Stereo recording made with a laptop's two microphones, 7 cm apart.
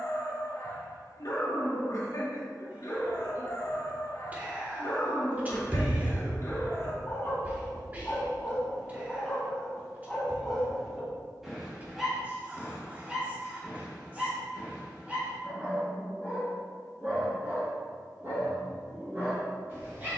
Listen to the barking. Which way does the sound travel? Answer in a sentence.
In this clip you hear the barking travel towards the right.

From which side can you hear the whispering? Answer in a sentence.
You can hear the whispering on the right.